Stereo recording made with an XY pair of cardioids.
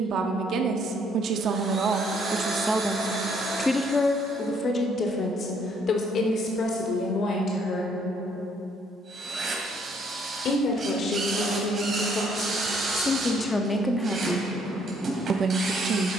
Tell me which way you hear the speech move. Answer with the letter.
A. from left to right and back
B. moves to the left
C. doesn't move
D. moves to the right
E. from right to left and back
E.